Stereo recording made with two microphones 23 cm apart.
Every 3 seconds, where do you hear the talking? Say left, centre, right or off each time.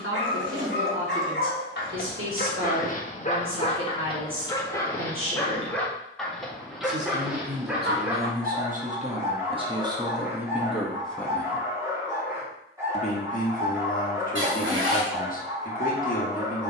right, right, right, centre, left, left.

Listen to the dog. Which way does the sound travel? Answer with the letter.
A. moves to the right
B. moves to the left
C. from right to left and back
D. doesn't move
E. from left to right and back
A.